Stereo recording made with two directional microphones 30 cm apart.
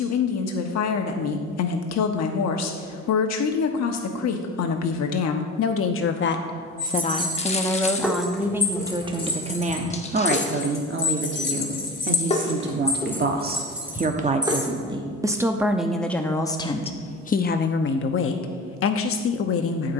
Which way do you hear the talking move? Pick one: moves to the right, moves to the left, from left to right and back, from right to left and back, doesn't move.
from left to right and back.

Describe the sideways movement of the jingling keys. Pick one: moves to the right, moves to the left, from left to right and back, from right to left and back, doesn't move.
from right to left and back.